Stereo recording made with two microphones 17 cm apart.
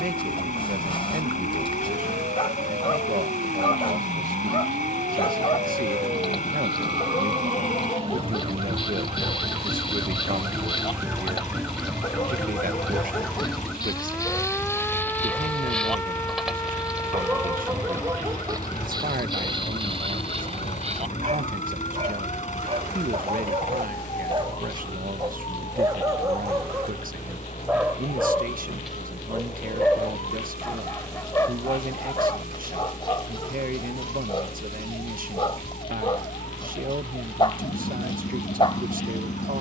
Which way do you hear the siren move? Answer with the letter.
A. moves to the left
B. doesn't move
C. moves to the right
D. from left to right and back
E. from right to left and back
A.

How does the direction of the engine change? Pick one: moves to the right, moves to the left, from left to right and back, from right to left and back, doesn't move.
doesn't move.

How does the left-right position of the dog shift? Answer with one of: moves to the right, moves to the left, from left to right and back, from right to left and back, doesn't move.
from left to right and back.